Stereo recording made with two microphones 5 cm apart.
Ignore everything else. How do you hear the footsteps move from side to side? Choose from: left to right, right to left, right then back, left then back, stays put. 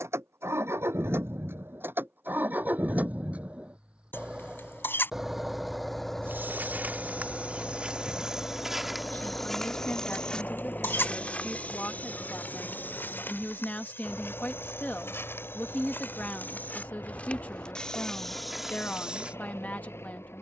left then back.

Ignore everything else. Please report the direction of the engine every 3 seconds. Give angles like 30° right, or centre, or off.
40° right, 10° right, 10° left, 30° left, 40° left, 50° left, 50° left.